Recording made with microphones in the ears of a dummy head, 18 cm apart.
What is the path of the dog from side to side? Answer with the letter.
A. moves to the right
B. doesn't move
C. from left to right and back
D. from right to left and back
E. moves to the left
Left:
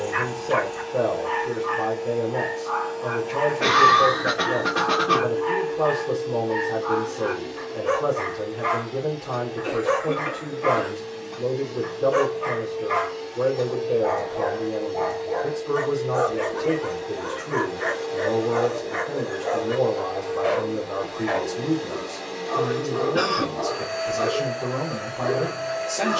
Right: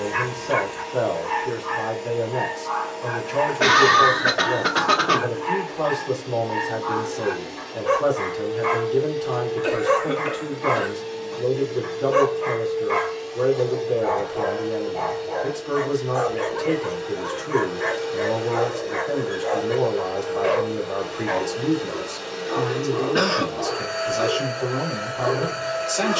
B.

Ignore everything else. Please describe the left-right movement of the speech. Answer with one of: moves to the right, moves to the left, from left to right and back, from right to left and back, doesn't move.
doesn't move.